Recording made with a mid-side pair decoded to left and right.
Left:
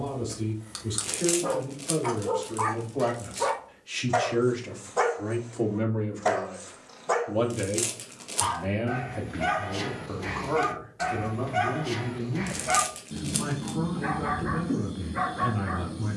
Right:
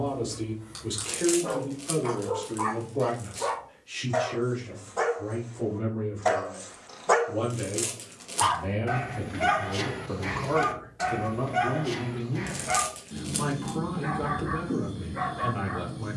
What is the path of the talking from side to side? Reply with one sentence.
You can hear the talking move from right to left and back again.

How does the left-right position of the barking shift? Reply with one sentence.
You can hear the barking move from left to right and back again.